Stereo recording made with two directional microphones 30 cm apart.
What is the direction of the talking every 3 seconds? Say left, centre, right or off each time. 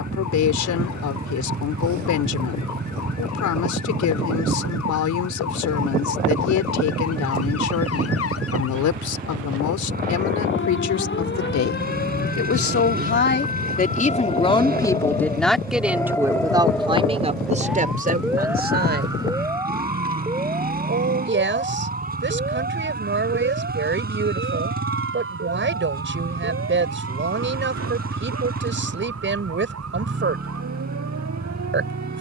left, left, left, left, left, centre, right, right, right, right, right.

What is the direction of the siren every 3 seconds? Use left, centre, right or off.
left, left, left, left, left, centre, centre, right, right, right, right.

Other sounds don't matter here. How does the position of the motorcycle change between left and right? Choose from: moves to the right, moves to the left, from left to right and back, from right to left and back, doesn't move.
doesn't move.